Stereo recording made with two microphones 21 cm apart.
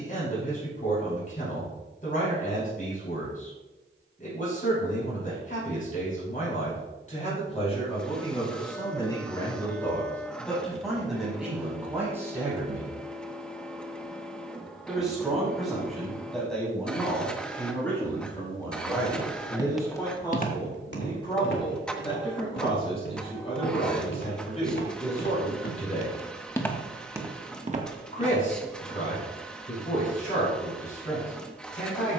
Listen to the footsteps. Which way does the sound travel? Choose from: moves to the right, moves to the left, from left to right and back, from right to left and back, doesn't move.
from right to left and back.